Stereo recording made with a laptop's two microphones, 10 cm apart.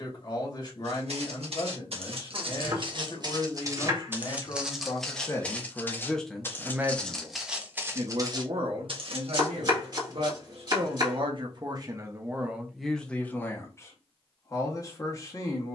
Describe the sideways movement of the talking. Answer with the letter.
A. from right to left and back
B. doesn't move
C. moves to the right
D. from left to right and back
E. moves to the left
D.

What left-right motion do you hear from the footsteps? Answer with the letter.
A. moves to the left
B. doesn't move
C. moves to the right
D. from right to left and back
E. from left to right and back
D.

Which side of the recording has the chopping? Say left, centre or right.
right.